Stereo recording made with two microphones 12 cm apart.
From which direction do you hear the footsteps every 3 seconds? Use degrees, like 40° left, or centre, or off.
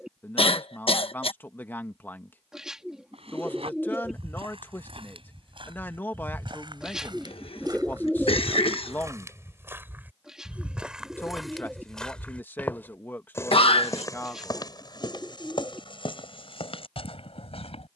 off, 50° right, 40° right, 10° right, 20° left, 50° left.